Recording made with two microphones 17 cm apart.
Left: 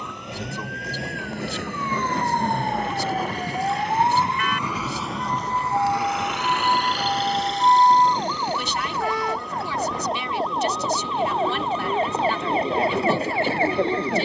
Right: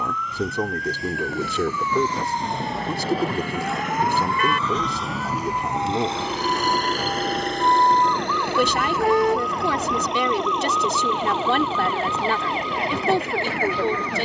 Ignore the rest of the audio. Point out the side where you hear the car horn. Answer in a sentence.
In this clip you hear the car horn on the right.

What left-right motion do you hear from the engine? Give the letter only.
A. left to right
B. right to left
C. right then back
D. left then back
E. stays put
A.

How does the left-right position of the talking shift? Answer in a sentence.
In this clip you hear the talking stay put.